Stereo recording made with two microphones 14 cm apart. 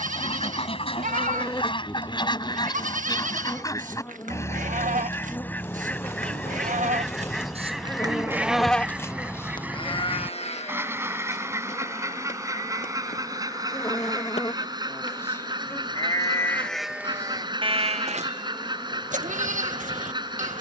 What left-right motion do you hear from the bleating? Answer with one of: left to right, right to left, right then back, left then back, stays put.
left then back.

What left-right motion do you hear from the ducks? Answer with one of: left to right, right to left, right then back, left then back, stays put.
left to right.